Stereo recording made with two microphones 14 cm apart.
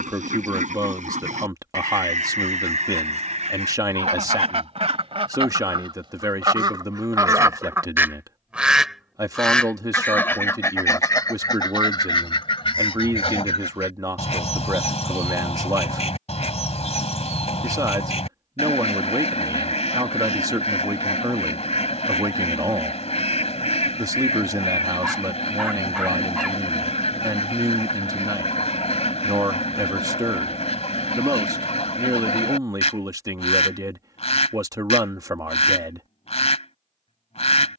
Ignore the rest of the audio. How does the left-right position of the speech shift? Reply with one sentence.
In this clip you hear the speech stay put.